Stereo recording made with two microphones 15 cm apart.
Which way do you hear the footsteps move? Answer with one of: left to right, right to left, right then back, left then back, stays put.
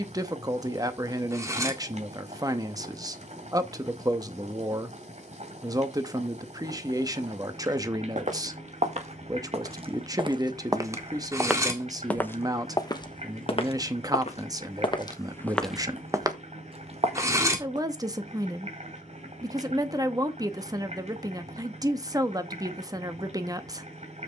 left then back.